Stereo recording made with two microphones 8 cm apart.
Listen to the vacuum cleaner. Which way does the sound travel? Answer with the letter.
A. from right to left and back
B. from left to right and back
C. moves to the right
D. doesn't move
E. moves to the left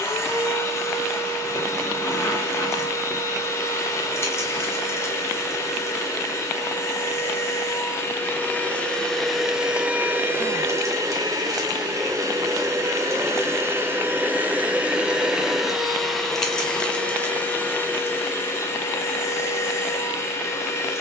B.